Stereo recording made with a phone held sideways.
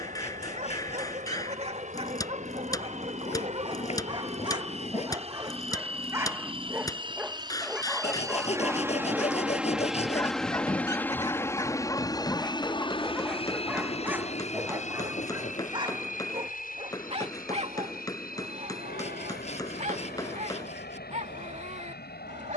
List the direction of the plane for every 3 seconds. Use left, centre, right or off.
right, right, right, centre, left, left, left, left.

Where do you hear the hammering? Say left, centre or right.
left.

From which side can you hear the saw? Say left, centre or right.
left.